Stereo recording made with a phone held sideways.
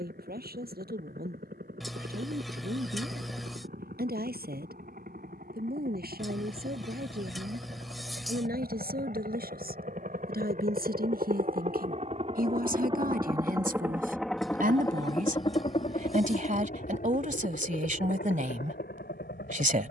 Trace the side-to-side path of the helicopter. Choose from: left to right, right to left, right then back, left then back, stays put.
right to left.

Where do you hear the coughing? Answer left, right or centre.
centre.